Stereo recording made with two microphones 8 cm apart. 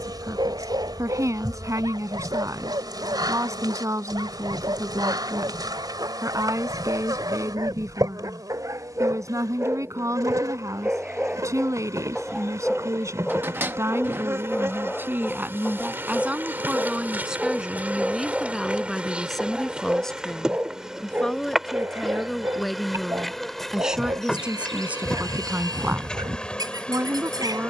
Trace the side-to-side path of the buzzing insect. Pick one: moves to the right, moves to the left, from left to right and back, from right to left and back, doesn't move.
moves to the left.